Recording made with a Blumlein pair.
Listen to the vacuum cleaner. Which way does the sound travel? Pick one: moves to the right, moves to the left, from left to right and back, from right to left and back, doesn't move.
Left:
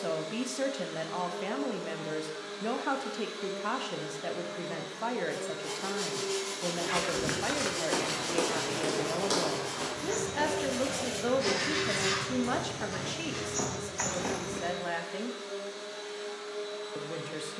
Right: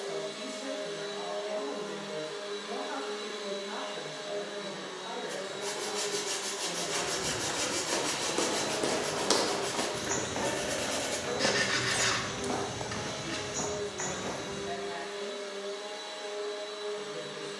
doesn't move.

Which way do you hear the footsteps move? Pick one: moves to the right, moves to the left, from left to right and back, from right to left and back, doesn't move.
from left to right and back.